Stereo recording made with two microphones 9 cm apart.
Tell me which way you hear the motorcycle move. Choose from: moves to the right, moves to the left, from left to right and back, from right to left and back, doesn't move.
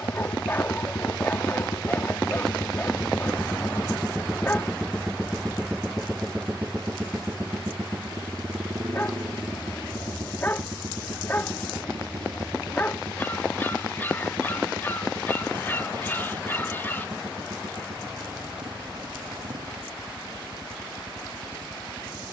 moves to the right.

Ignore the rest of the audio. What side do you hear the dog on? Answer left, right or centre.
left.